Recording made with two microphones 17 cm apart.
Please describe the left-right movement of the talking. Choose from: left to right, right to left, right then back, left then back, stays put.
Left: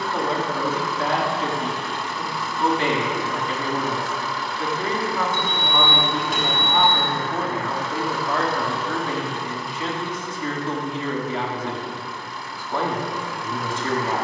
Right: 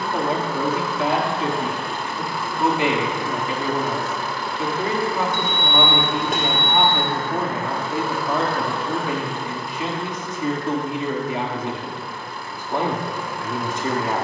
stays put.